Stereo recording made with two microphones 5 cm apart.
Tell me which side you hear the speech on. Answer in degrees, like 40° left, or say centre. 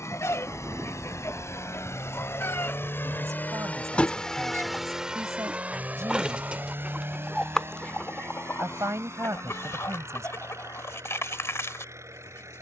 70° right.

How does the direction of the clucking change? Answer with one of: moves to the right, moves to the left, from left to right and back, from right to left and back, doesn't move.
from left to right and back.